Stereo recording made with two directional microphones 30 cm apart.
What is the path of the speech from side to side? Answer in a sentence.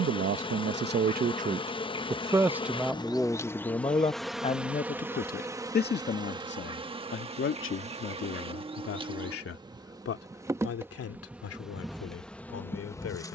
You can hear the speech move to the left.